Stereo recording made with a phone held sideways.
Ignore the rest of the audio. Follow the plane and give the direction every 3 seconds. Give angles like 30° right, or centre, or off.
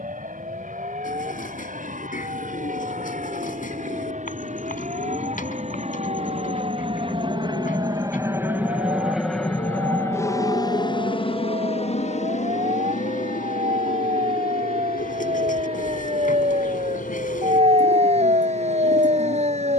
70° right, 60° right, 30° right, 20° left, 50° left, 70° left, 70° left.